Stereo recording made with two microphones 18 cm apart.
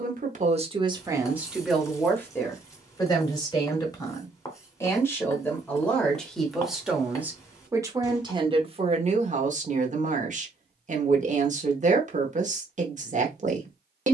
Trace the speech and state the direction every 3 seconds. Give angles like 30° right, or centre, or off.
20° right, 20° left, 10° right, 40° right, 40° right.